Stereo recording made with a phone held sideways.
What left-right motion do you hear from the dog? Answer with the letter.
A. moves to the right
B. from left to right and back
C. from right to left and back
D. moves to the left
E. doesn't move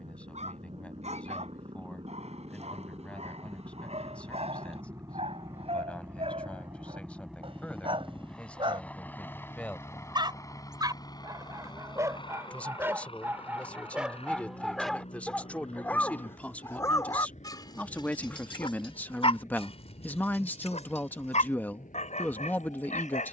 D.